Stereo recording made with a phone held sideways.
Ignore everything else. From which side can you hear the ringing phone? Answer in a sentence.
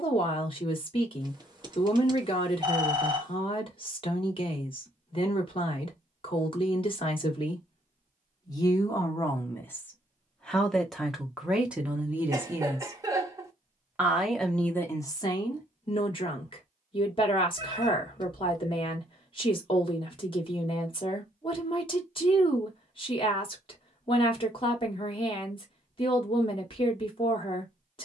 You can hear the ringing phone on the right.